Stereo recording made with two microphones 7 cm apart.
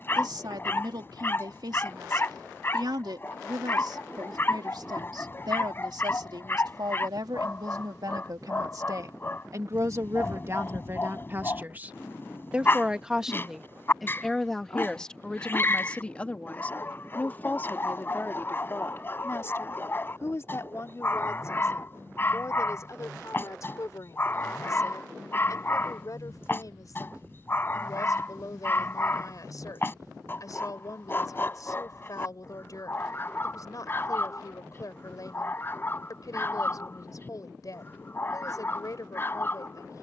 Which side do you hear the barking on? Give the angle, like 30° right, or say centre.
30° left.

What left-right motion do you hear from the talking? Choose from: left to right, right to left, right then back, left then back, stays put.
right to left.